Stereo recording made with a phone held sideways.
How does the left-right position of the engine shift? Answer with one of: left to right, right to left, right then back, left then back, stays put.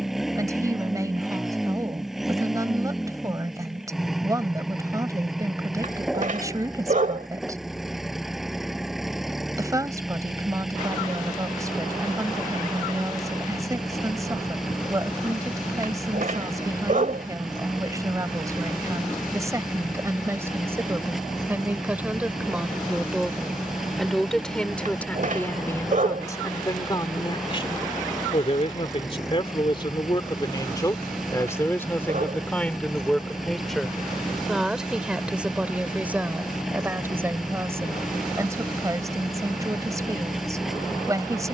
stays put.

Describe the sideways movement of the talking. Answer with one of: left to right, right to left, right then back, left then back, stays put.
left then back.